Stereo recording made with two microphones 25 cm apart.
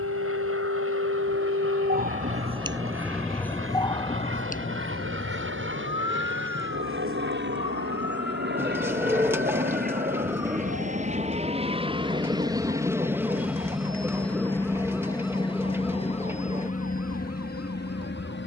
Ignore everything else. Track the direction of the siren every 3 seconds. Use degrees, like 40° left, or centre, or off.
40° right, 30° left, 60° left, 70° left, 70° left, 70° left.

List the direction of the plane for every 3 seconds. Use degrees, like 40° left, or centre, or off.
70° right, 60° right, 50° right, 30° right, centre, 30° left.